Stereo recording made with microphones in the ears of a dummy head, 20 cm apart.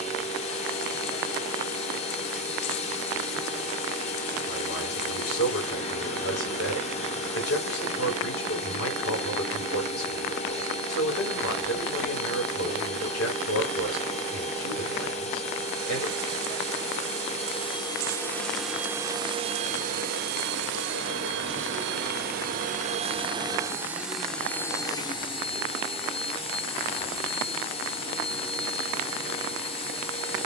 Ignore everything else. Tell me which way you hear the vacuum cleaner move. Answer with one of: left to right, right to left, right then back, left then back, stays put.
right then back.